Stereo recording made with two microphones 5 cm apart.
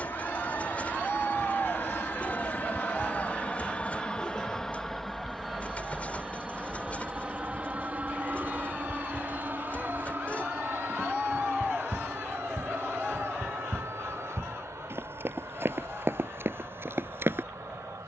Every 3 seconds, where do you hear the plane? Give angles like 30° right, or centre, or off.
40° left, 10° left, 20° right, 40° right, 50° right, 60° right.